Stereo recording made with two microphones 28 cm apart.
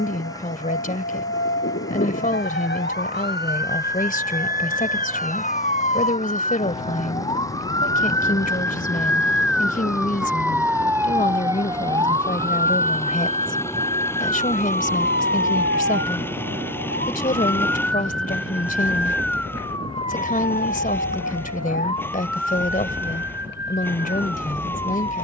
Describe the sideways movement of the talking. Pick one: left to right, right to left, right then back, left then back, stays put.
stays put.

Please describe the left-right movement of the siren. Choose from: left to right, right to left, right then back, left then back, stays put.
left to right.